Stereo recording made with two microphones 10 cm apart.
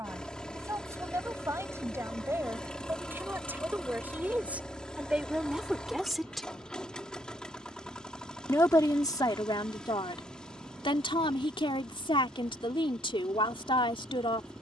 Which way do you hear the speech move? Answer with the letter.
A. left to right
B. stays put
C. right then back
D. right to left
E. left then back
D.